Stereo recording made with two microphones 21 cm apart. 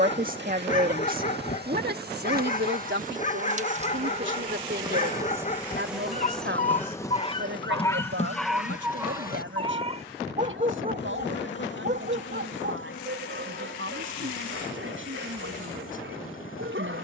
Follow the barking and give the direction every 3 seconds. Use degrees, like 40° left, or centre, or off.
40° left, 40° left, 20° left, 30° right, 60° right, 70° right.